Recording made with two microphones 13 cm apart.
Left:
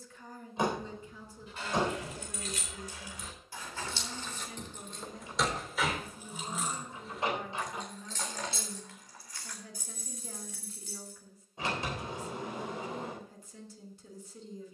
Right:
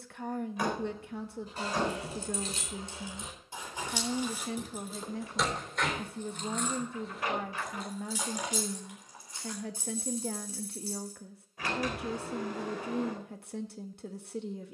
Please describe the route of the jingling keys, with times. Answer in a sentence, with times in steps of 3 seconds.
In this clip you hear the jingling keys on the right from 0 s, in the centre from 3 s, on the right from 9 s and not at all from 12 s.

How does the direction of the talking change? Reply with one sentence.
In this clip you hear the talking stay put.